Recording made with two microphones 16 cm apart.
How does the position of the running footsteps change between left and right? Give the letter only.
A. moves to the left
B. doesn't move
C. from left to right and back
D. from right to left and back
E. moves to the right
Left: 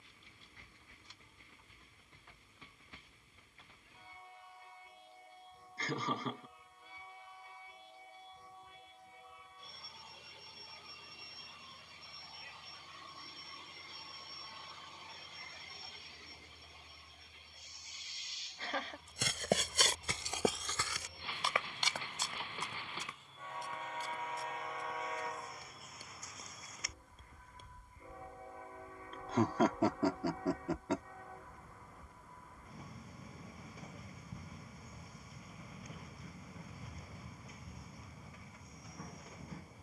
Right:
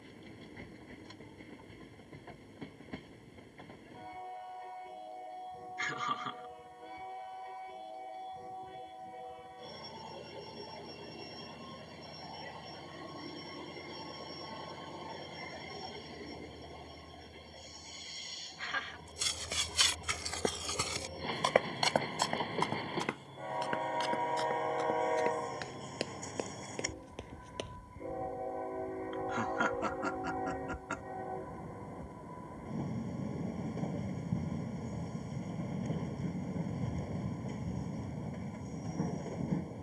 E.